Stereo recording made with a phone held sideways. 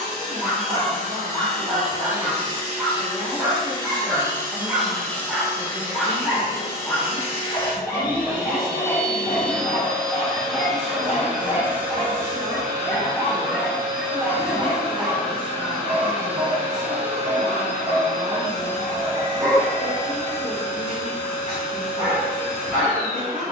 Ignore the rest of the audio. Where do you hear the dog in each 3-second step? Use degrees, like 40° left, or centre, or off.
30° right, 10° right, 20° left, 40° left, 10° left, 20° right, 30° right, 30° right.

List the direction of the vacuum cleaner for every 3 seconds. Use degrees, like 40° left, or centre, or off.
50° right, 10° right, 30° left, centre, 30° right, 40° right, 50° right, 50° right.